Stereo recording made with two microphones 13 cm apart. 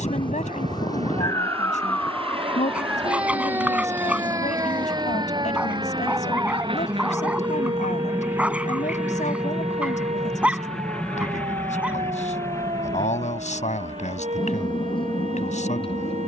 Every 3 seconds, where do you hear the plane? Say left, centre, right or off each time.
right, right, right, centre, left, left.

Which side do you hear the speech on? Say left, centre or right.
left.